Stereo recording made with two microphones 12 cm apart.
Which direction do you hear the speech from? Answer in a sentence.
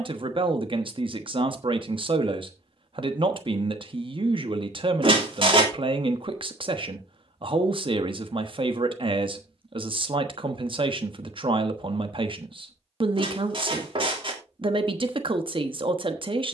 You can hear the speech on the right.